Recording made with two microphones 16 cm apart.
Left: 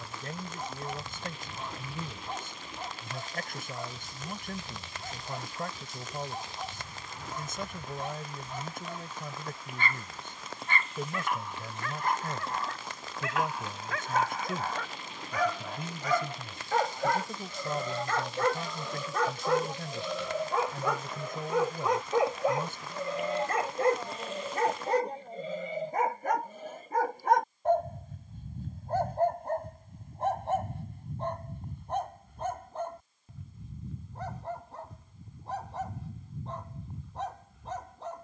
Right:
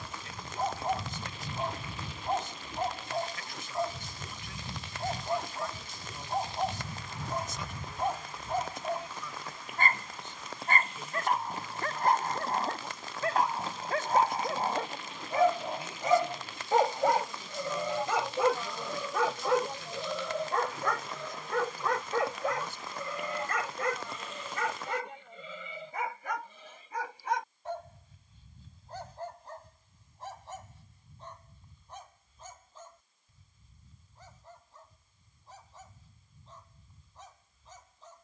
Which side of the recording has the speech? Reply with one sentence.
You can hear the speech on the left.